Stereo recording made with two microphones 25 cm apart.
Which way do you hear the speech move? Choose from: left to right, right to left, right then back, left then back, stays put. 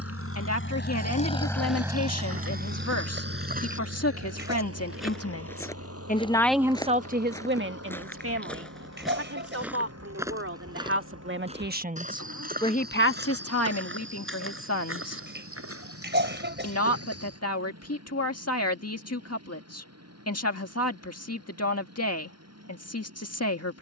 right then back.